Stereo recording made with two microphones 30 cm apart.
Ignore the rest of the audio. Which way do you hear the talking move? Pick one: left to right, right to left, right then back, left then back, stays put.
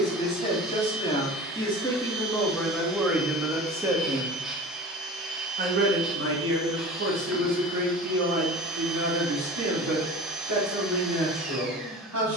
left to right.